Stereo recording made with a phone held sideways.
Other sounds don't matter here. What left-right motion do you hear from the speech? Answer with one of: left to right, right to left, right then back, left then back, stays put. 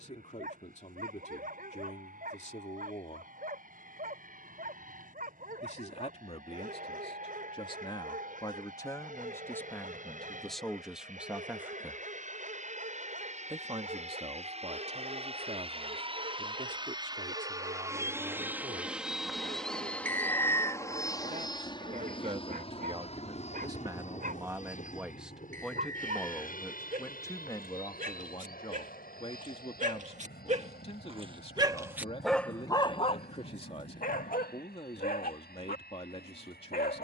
right then back.